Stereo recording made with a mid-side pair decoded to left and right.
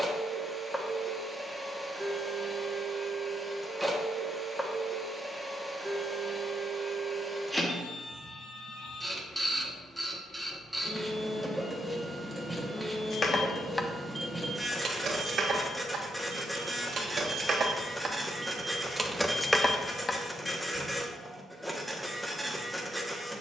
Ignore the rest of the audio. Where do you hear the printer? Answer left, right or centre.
centre.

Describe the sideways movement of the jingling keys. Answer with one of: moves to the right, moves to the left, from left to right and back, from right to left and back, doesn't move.
from left to right and back.